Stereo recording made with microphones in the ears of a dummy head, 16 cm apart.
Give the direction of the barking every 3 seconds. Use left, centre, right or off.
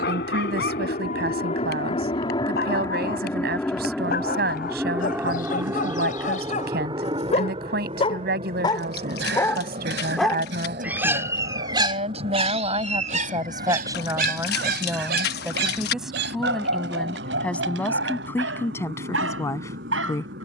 left, left, left, centre, right, right, right.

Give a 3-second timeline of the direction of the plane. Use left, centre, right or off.
left, centre, right, right, right, right, right.